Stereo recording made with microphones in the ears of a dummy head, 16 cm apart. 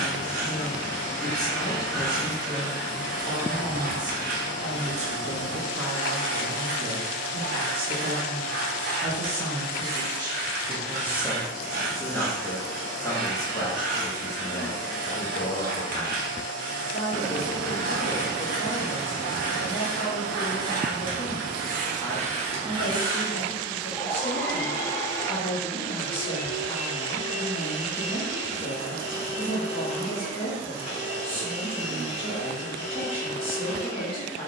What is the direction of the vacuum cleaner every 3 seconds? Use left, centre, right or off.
right, right, right, right, right, right, right, right, left, left, left, left.